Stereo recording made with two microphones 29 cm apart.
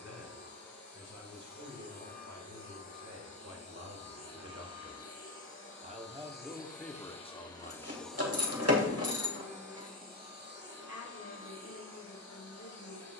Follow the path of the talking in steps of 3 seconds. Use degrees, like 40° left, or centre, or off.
70° right, 50° right, 10° left, 60° left, 70° left.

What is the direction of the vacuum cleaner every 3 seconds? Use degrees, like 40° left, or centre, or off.
70° left, 50° left, 20° left, 30° right, 50° right.